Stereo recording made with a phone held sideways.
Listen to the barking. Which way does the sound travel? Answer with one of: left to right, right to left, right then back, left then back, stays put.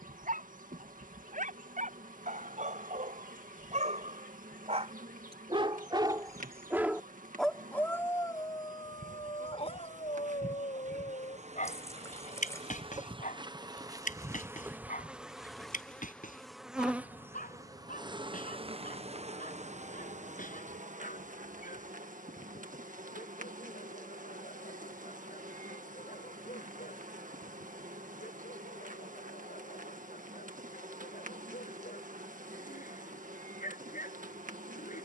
right to left.